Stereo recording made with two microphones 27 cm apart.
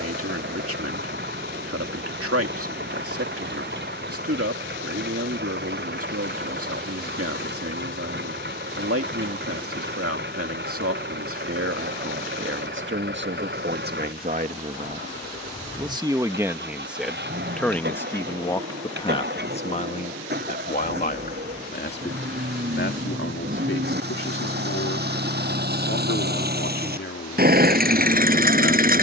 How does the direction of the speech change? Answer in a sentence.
You can hear the speech move to the left.